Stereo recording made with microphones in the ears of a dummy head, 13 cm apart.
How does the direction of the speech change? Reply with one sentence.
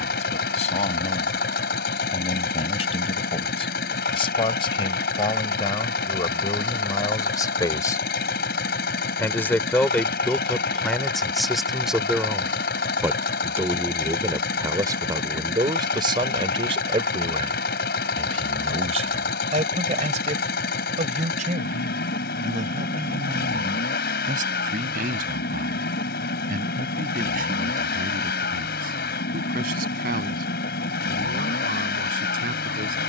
In this clip you hear the speech move to the right.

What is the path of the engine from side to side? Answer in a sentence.
In this clip you hear the engine stay in one place.